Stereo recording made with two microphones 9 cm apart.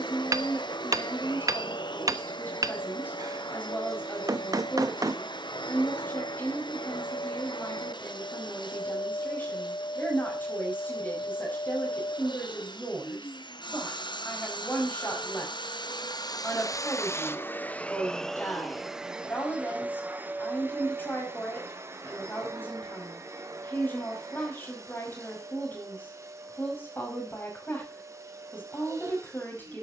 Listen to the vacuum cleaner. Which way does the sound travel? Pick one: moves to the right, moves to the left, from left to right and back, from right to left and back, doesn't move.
moves to the right.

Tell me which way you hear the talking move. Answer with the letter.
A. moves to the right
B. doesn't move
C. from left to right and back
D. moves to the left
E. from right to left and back
B.